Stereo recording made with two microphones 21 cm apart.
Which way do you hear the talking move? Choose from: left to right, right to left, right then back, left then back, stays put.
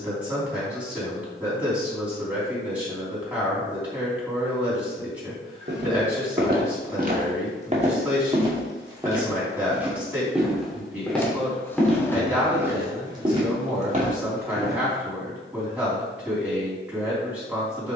stays put.